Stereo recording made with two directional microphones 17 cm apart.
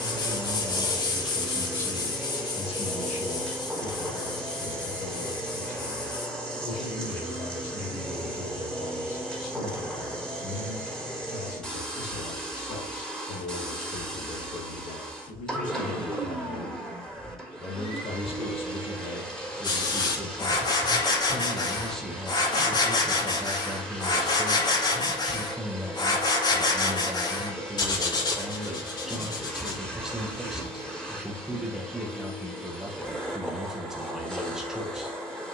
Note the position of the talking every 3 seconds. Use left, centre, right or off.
centre, left, left, left, left, left, left, centre, centre, centre, centre, centre.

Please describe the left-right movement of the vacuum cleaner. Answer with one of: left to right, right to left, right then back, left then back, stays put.
stays put.